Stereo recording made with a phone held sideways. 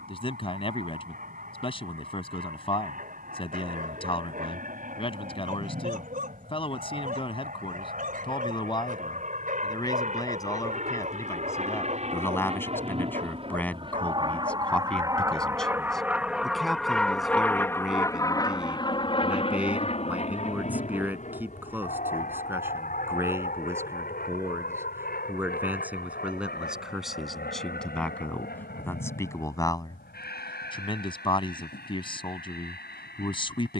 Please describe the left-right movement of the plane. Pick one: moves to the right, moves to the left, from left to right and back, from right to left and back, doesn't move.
moves to the left.